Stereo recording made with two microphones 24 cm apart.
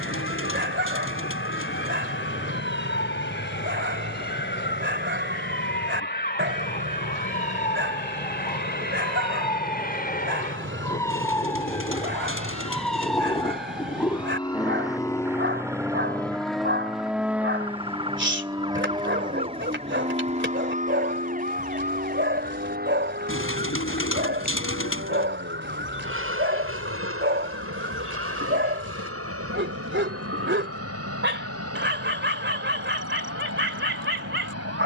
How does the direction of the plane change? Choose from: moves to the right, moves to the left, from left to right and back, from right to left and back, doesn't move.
moves to the right.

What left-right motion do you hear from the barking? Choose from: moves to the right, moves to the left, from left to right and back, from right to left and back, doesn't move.
doesn't move.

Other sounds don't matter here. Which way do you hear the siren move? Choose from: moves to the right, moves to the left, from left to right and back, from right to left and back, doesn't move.
moves to the right.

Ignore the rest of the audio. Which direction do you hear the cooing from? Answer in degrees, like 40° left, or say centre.
60° left.